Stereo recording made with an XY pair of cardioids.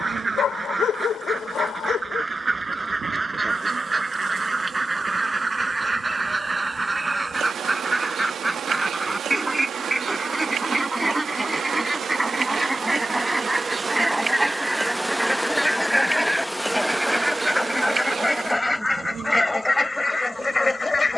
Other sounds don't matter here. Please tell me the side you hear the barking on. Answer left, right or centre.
left.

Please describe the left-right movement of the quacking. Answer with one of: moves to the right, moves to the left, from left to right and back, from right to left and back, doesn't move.
moves to the left.